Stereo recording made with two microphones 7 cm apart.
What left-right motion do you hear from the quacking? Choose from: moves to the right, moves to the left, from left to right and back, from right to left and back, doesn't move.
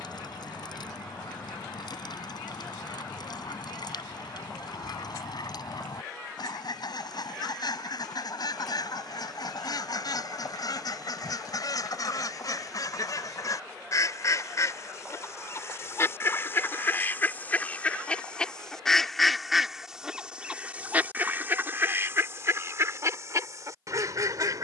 moves to the right.